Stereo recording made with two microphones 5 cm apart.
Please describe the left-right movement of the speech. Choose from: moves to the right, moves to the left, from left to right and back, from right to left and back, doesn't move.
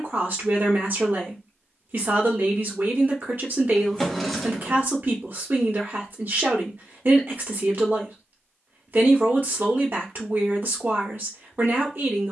doesn't move.